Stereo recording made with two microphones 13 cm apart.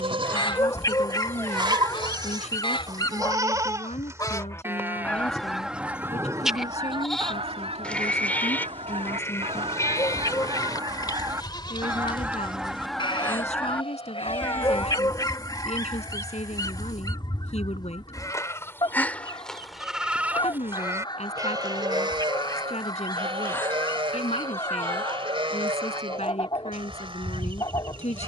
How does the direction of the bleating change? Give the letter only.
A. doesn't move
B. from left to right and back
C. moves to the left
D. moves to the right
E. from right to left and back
E.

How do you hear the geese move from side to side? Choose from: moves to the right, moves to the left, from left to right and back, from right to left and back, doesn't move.
from left to right and back.